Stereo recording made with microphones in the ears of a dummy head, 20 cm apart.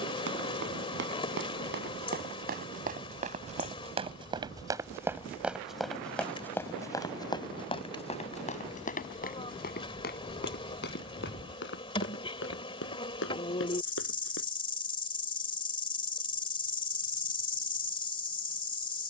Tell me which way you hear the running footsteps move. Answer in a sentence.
You can hear the running footsteps travel towards the left.